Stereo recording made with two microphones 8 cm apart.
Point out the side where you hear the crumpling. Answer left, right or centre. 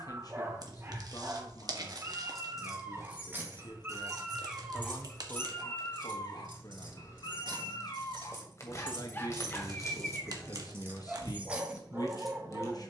right.